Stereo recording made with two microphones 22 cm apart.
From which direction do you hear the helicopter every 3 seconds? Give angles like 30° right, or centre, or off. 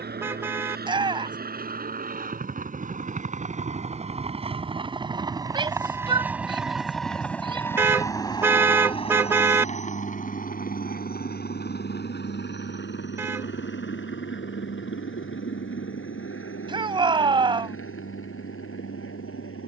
50° right, 30° right, 10° left, 40° left, 60° left, 70° left, 70° left.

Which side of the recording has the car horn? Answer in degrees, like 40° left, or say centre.
10° right.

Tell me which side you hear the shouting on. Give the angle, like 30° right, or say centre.
20° right.